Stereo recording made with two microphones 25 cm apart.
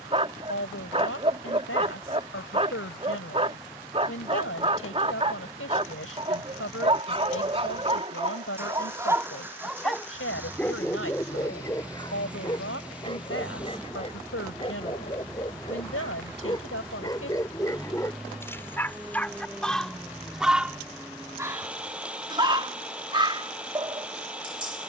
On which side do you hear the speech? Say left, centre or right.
left.